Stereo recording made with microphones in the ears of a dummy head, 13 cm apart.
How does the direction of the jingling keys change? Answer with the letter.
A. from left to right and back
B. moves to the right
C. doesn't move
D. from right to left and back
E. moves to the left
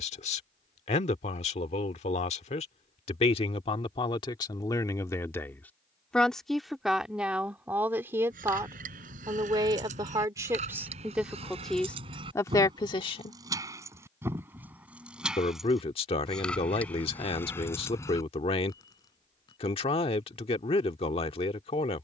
E.